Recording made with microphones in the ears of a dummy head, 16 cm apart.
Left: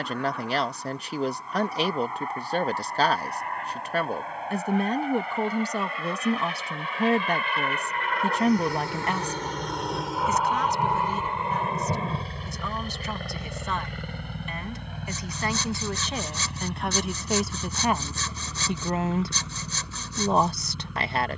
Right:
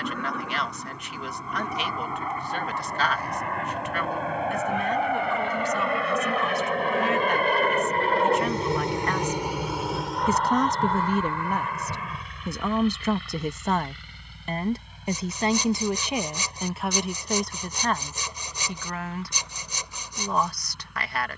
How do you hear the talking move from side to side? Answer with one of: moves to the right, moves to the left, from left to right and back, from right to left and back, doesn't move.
from left to right and back.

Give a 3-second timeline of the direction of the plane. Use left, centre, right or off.
right, right, right, centre, left, left, left.